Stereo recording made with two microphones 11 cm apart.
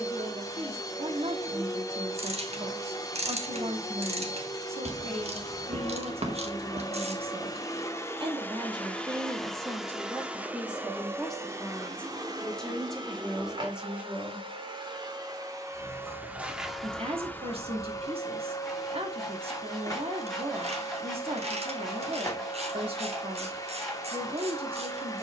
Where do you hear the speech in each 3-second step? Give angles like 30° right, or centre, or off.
70° right, 70° right, 60° right, 10° right, centre, 60° right, 60° right, 60° right, 60° right.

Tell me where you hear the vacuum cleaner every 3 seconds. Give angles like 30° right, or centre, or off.
30° left, 30° left, 30° left, 10° right, 40° right, 10° right, 30° left, 30° left, 30° left.